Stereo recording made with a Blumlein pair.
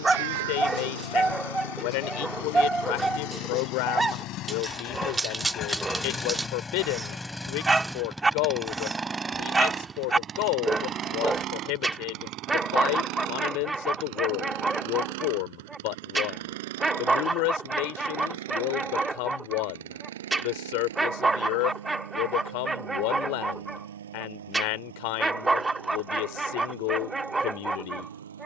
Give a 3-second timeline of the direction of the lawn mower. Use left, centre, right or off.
left, left, centre, right, right, right, right, right, right, right.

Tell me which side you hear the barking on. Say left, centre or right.
centre.